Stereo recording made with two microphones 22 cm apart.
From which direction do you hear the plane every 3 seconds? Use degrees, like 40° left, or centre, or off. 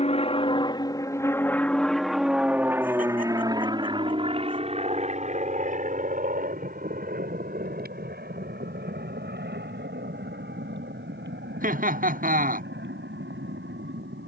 10° left, 30° right, 40° right, 50° right, 60° right.